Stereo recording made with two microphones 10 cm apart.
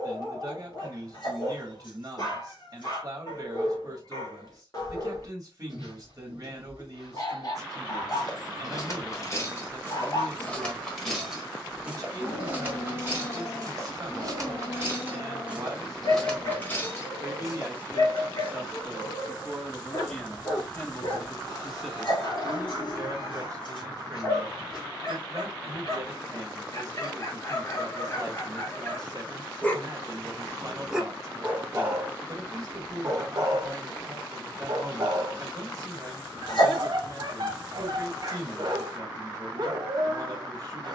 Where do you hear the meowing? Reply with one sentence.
You can hear the meowing on the left.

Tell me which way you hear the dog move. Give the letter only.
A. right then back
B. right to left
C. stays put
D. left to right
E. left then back
D.